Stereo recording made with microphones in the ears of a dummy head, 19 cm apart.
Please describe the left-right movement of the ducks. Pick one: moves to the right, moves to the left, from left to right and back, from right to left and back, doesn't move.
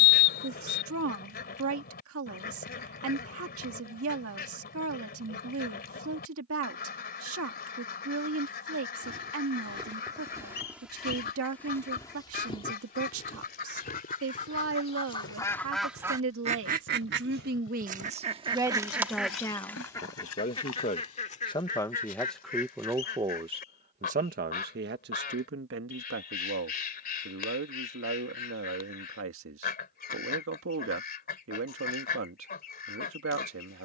from left to right and back.